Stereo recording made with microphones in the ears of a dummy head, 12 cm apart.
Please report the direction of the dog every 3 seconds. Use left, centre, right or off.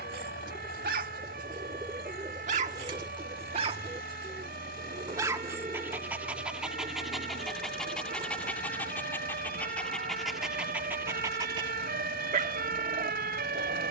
right, right, centre, centre, right.